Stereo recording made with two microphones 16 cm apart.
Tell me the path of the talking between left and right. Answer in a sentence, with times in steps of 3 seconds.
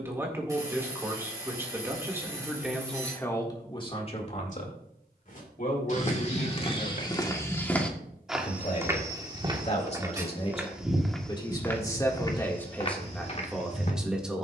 In this clip you hear the talking in the centre from 0 s, on the left from 3 s and in the centre from 12 s.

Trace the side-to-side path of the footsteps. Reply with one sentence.
You can hear the footsteps go right and come back.